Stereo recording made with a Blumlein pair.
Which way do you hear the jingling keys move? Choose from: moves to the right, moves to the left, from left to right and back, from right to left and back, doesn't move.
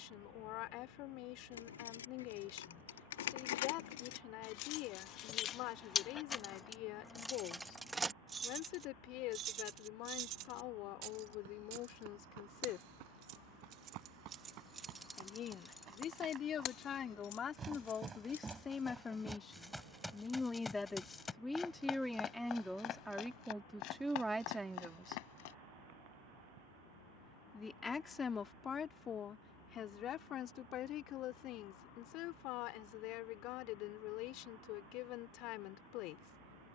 from left to right and back.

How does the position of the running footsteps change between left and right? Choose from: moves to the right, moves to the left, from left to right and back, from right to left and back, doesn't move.
moves to the left.